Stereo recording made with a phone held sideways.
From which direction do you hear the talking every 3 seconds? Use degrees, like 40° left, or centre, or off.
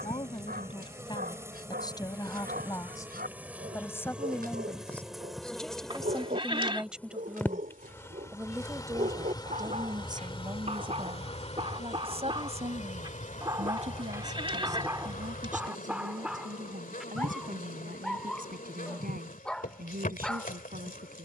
30° left, 10° left, 10° right, 30° right, 50° right, 60° right, 70° right.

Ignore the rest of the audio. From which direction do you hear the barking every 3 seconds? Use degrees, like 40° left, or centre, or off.
80° right, 80° right, 60° right, 50° right, 20° right, 10° right, 10° left.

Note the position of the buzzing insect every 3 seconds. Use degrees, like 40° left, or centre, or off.
20° right, centre, 10° left, 40° left, 60° left, 60° left, 60° left.